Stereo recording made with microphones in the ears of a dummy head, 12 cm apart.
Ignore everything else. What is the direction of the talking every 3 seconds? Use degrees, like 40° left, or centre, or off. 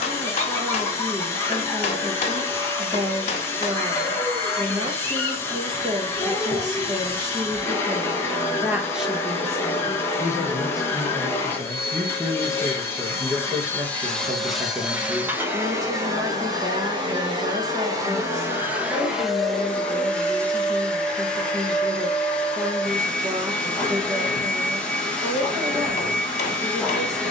30° right, 30° right, 20° right, 10° left, 20° right, 30° right, 30° right, 30° right, 30° right.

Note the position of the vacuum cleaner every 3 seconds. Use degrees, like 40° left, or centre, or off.
20° left, 20° left, 20° left, 20° left, 10° left, 30° right, centre, 10° left, 10° left.